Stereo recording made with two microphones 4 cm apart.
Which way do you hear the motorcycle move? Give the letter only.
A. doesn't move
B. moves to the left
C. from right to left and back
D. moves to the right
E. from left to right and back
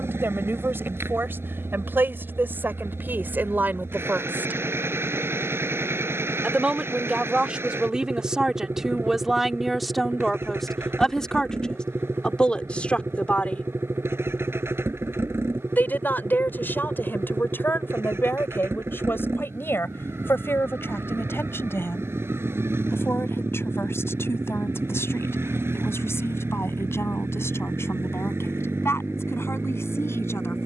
A.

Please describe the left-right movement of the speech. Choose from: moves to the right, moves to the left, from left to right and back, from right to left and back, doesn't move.
moves to the left.